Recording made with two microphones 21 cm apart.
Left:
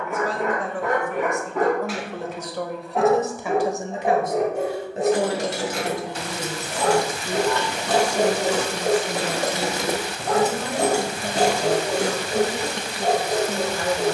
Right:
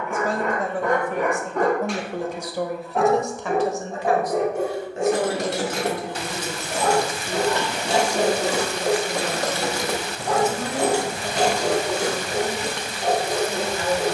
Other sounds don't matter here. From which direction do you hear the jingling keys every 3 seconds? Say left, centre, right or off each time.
off, right, right, left, left.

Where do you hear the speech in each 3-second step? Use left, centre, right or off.
right, left, left, left, left.